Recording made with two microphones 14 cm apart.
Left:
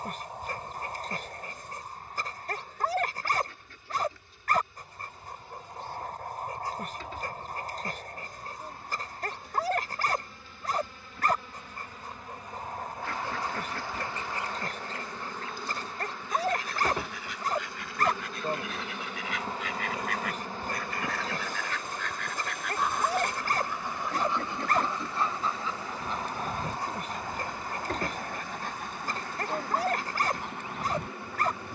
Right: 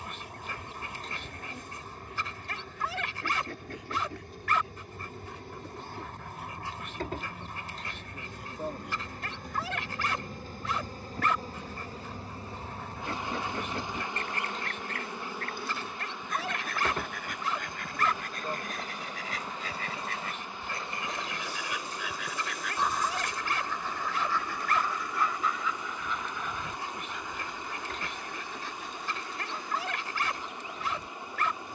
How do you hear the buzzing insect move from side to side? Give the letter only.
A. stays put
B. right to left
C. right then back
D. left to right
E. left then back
B.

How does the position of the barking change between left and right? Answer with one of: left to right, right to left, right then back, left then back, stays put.
stays put.